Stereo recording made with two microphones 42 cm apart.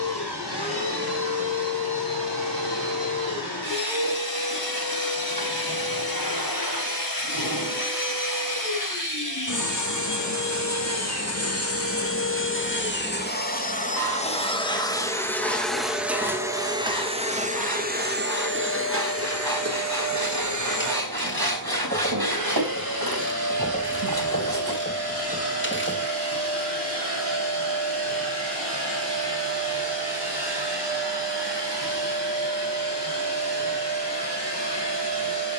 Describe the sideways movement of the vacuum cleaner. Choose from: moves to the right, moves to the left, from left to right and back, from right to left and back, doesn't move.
moves to the right.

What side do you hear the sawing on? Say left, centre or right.
right.